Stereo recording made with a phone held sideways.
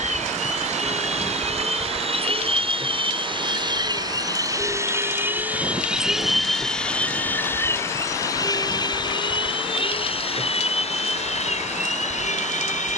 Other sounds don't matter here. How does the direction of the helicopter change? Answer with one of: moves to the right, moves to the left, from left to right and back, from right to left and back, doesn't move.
moves to the left.